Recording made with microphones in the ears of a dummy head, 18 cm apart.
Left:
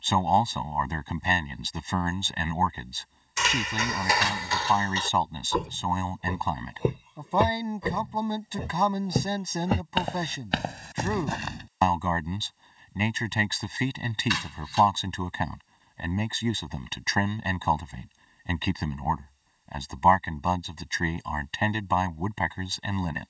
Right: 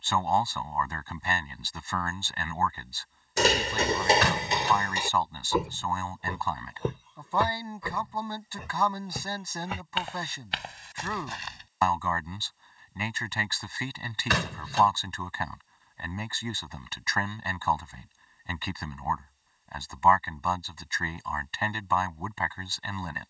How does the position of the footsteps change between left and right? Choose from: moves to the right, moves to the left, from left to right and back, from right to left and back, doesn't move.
moves to the left.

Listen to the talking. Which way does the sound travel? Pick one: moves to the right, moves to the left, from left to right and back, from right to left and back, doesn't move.
doesn't move.